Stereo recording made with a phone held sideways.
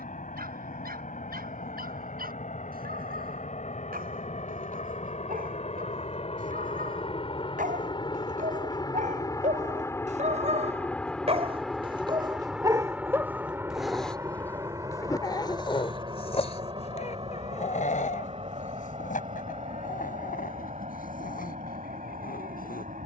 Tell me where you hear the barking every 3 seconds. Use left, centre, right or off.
right, right, right, right, centre, left, left, left.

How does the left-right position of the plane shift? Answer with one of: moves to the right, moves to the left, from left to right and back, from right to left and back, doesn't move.
moves to the right.